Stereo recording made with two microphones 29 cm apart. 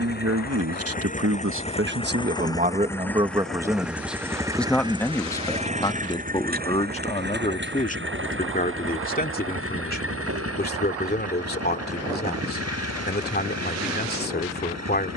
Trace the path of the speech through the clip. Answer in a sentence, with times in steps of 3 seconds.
In this clip you hear the speech on the right from 0 s, in the centre from 3 s and on the left from 6 s.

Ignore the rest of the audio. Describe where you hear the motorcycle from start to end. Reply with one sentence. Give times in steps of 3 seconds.
You can hear the motorcycle on the left from 0 s, in the centre from 3 s and on the right from 6 s.